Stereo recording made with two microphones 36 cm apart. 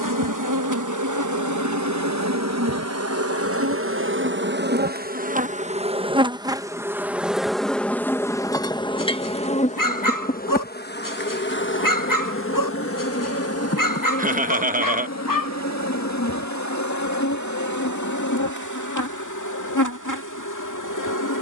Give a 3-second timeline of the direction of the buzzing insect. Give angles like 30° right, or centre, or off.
50° right, 30° right, centre, 30° left, 40° left, 50° left, 60° left.